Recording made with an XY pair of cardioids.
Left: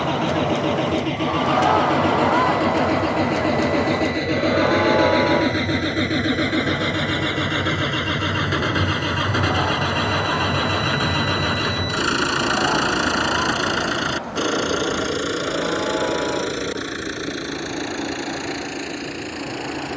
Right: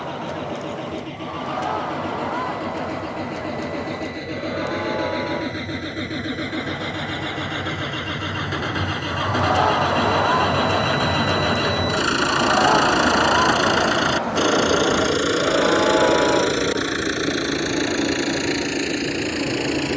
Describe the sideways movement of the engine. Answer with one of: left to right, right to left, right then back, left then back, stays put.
left to right.